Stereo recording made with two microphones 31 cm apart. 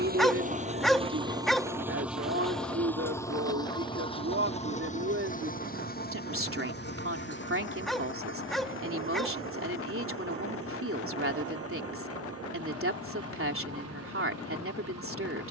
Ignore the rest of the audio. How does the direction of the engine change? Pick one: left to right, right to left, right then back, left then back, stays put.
right to left.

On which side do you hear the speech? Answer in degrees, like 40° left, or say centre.
40° right.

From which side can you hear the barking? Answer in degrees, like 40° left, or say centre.
centre.